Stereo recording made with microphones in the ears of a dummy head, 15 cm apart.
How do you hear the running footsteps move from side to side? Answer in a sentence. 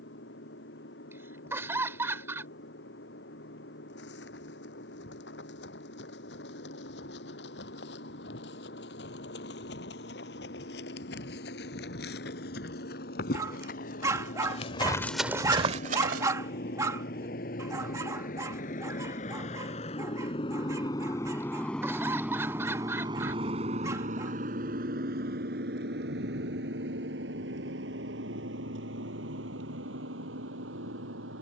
In this clip you hear the running footsteps go from the left side to the right.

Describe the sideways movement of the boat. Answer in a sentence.
You can hear the boat go from the left side to the right.